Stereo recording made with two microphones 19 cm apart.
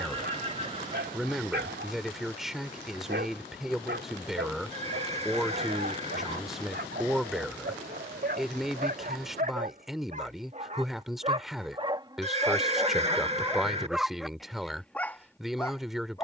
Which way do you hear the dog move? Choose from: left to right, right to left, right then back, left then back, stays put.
right to left.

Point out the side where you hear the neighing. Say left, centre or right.
right.